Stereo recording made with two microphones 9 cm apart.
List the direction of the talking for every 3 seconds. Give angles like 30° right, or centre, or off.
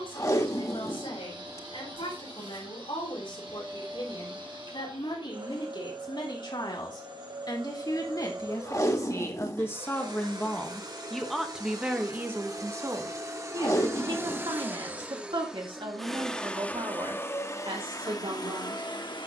70° left, 60° left, 50° left, 10° left, 40° right, 60° right, 70° right.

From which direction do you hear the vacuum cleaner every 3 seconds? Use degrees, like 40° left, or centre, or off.
60° right, 60° right, 50° right, 50° right, 30° right, 10° left, 50° left.